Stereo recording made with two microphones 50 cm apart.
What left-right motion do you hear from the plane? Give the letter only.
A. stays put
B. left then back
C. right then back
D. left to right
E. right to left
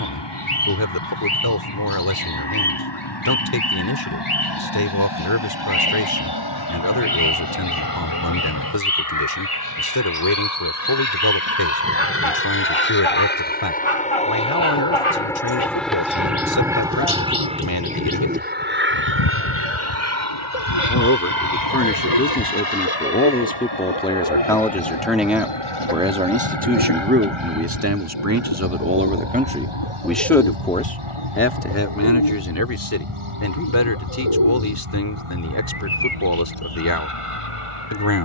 D.